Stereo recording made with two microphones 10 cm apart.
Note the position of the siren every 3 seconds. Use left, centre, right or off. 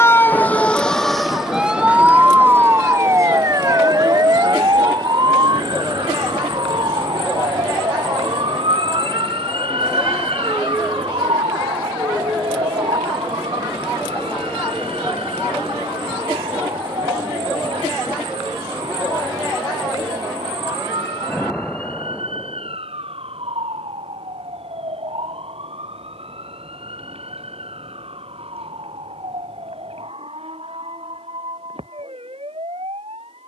centre, right, right, right, right, right, right, right, right, right, right.